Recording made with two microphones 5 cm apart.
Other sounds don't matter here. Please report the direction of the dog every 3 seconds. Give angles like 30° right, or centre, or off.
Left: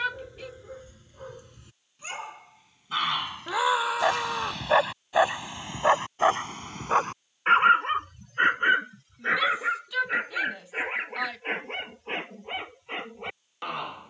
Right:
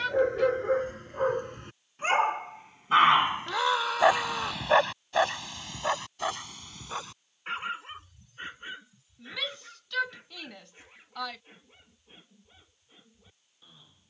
50° right, centre, 50° left, 70° left, 80° left.